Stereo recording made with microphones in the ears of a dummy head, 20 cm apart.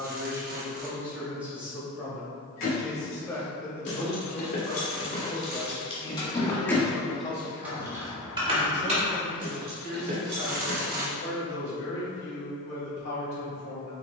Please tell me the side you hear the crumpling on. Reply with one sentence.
In this clip you hear the crumpling on the right.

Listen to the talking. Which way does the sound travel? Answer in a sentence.
In this clip you hear the talking travel towards the left.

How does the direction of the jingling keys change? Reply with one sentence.
You can hear the jingling keys move to the right.